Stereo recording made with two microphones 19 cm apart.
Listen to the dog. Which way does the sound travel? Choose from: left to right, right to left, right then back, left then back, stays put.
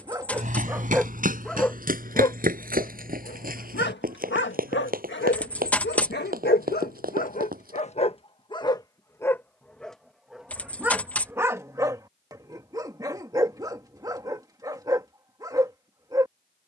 left then back.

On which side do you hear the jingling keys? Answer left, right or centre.
centre.